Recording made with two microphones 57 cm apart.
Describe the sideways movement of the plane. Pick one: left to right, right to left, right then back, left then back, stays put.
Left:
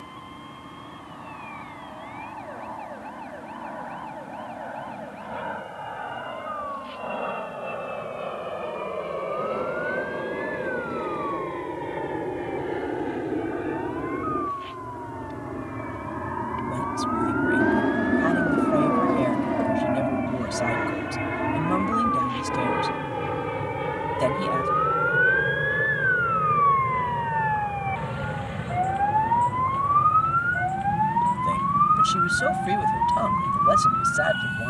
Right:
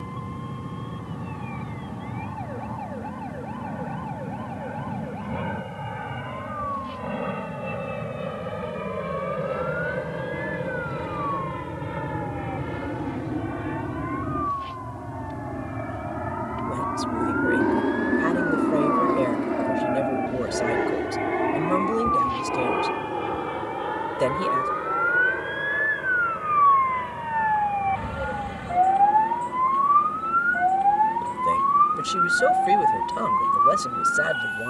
right to left.